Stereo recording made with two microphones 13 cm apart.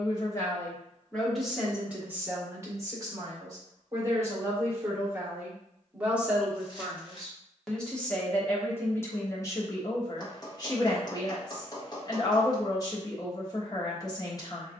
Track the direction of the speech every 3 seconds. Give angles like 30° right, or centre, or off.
centre, 20° right, centre, 30° left, 30° left.